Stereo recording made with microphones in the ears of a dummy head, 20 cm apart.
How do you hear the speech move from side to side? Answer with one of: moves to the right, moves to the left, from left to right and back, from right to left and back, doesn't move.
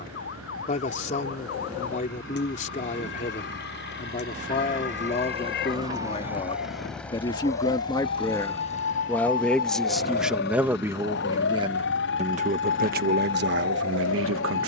moves to the right.